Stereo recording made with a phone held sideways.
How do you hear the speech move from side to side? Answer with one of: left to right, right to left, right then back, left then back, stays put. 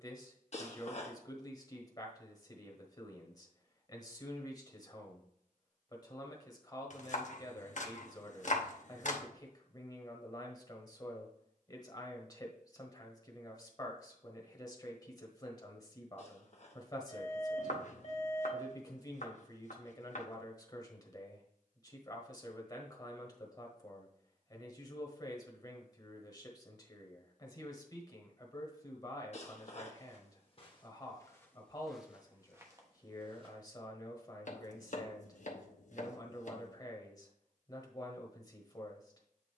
stays put.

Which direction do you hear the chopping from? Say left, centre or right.
left.